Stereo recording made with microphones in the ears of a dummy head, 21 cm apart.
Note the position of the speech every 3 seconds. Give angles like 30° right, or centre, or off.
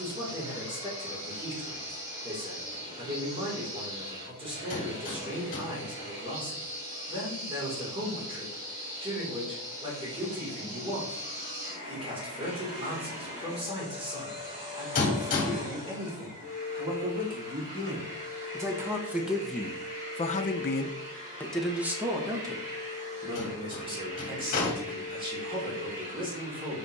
30° right, 30° right, 30° right, 30° right, 30° right, 20° right, 10° left, 20° right, 20° right.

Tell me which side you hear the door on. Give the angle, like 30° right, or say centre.
40° left.